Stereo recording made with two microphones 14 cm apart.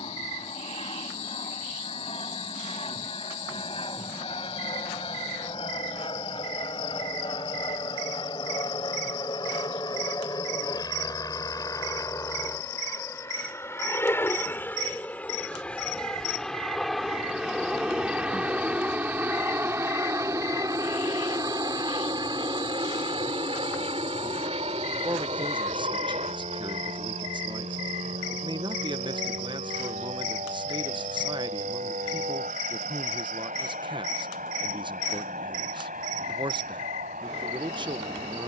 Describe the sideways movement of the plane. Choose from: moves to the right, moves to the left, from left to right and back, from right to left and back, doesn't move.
moves to the right.